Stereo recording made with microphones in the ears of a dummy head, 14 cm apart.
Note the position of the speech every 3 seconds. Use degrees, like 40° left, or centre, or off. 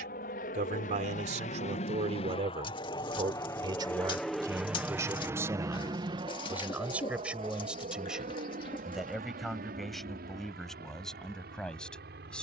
50° right, 20° right, 10° right, centre.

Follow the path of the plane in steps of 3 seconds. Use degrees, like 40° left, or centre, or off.
50° left, centre, 40° right, 50° right.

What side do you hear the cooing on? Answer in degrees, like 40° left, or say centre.
30° left.